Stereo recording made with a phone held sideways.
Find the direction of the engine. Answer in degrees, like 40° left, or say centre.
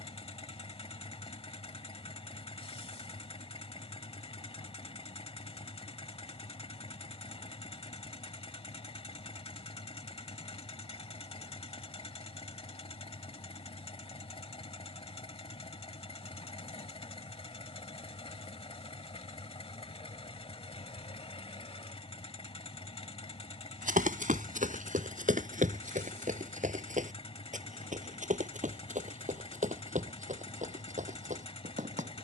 40° left.